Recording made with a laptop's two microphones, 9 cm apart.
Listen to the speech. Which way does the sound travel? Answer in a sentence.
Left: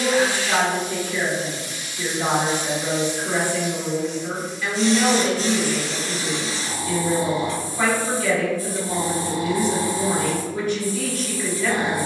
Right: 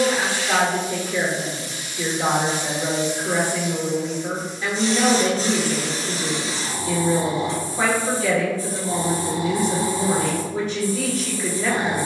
In this clip you hear the speech stay in one place.